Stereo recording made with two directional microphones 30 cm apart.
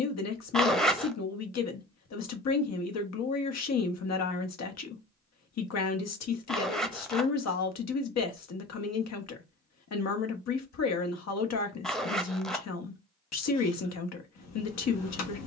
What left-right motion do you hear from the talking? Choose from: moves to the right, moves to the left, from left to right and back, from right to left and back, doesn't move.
doesn't move.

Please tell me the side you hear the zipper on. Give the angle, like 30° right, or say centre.
centre.